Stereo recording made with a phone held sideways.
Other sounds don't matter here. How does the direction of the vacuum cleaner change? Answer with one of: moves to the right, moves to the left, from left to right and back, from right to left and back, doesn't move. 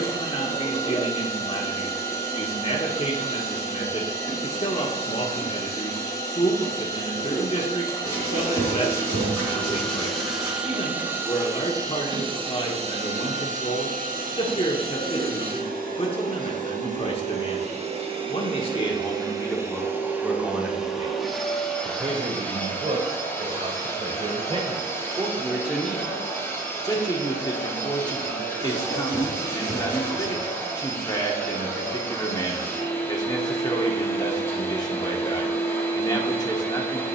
from left to right and back.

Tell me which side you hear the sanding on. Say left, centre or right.
right.